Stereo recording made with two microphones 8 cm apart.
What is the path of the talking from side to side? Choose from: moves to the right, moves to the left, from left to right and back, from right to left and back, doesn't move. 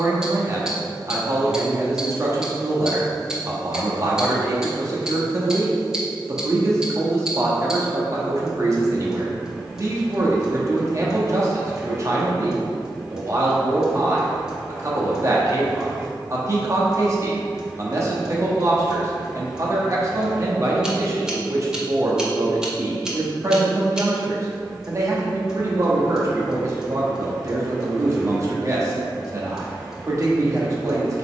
doesn't move.